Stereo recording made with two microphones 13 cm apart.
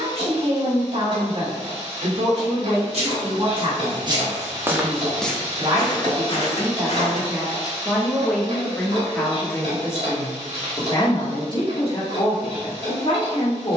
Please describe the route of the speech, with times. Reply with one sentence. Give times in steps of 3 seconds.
You can hear the speech on the right from 0 s, in the centre from 6 s and on the left from 9 s.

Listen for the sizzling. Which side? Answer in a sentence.
You can hear the sizzling on the right.